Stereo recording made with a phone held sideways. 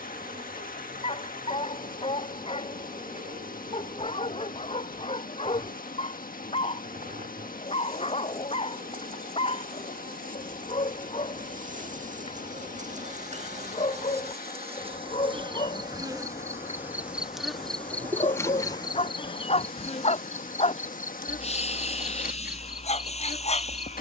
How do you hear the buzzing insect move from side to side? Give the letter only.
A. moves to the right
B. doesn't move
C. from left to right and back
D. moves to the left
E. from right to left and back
D.